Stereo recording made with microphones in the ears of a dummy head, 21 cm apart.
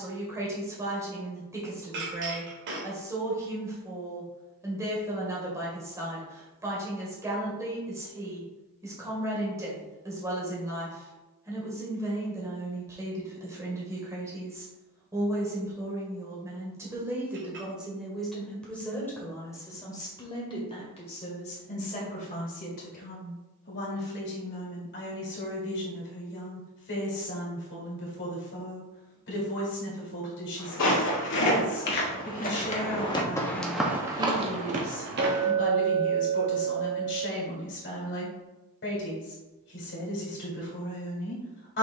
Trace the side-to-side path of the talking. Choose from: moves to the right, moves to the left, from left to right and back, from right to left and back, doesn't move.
moves to the left.